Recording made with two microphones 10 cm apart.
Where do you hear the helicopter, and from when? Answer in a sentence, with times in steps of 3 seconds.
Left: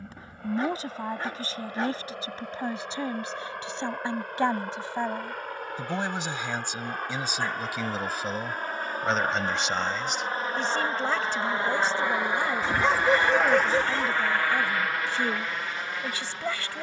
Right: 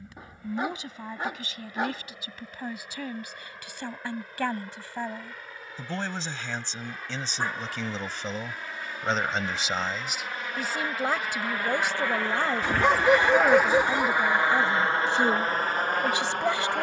You can hear the helicopter on the left from 0 s, in the centre from 12 s and on the right from 15 s.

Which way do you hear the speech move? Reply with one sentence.
You can hear the speech go from the left side to the right.